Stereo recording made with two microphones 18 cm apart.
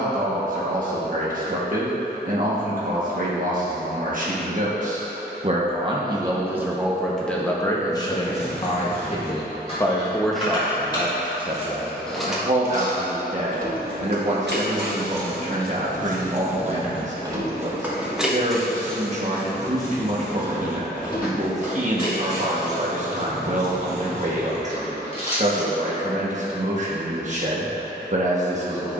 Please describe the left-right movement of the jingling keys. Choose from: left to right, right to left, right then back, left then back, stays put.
right then back.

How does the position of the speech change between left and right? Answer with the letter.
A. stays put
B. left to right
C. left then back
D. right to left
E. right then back
C.